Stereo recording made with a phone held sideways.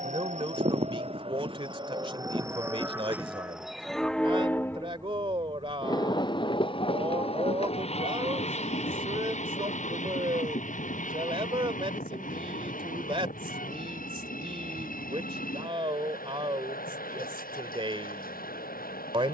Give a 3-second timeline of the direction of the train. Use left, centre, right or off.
right, centre, left, left, left, left, left.